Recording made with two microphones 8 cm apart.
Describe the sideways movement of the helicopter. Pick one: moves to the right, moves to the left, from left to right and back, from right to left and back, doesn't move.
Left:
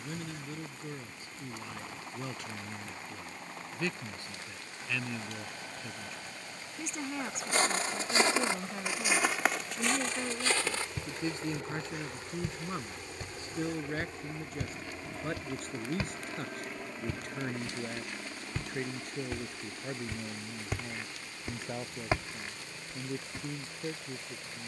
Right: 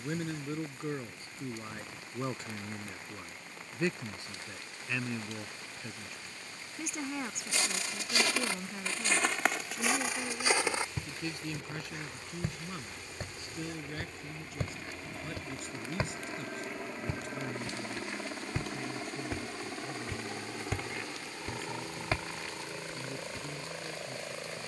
moves to the right.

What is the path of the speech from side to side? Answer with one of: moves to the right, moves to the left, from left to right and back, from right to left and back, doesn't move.
moves to the left.